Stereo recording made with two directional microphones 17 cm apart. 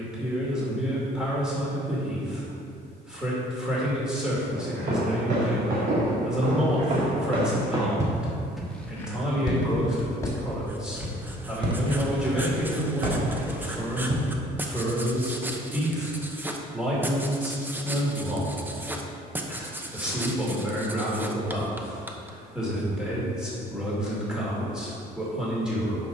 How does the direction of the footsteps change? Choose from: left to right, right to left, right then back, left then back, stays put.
left then back.